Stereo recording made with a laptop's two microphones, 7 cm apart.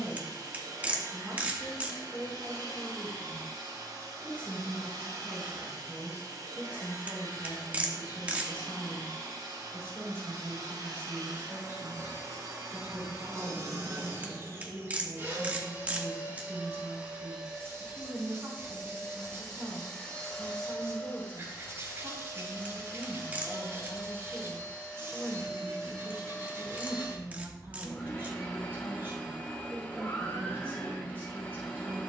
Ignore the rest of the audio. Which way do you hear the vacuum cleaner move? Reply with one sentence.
You can hear the vacuum cleaner go from the right side to the left.